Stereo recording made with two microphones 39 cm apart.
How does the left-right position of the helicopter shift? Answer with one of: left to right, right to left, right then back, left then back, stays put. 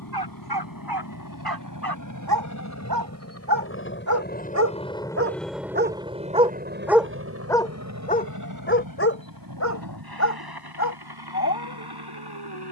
left to right.